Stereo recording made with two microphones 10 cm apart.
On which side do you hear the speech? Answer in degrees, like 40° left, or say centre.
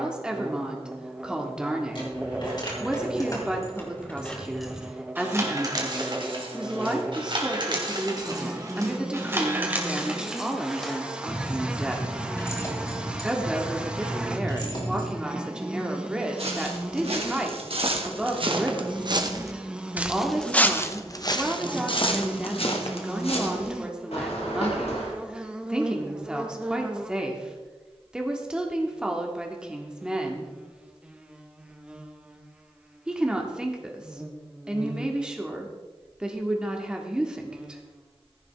10° right.